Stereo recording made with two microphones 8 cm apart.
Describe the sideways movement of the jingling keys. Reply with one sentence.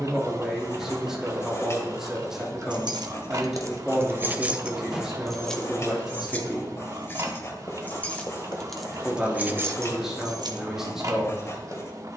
In this clip you hear the jingling keys move from right to left and back again.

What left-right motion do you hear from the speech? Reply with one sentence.
You can hear the speech stay in one place.